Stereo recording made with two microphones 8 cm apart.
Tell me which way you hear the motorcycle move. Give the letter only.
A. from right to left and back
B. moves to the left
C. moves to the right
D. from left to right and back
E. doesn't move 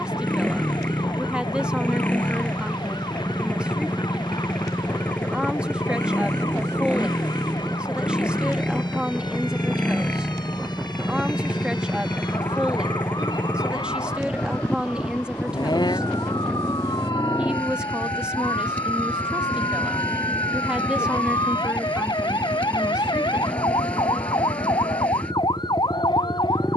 E.